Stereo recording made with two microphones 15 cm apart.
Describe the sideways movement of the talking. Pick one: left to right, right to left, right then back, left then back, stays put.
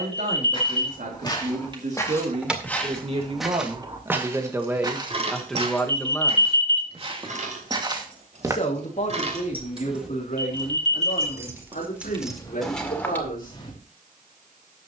right to left.